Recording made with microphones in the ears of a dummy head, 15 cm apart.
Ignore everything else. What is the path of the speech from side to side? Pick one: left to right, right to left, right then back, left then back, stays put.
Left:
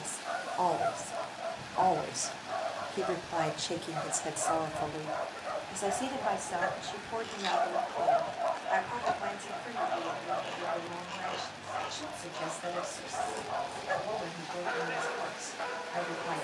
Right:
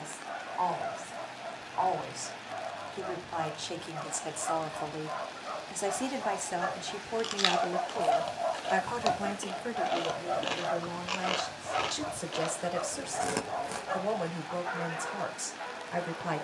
left to right.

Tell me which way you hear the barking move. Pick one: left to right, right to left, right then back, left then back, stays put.
right then back.